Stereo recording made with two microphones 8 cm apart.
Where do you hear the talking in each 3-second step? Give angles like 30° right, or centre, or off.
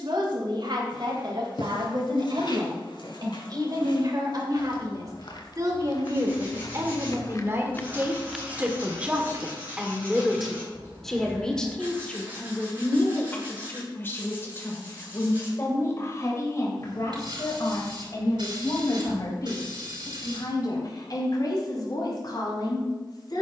70° right, 50° right, 30° right, centre, 20° left, 40° left, 50° left, 60° left.